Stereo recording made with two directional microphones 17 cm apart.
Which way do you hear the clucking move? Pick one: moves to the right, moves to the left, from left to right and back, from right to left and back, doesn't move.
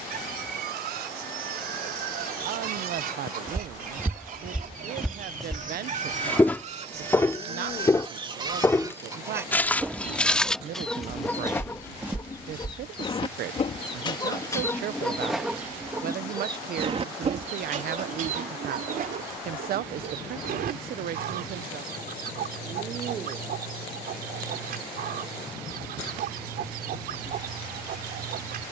from right to left and back.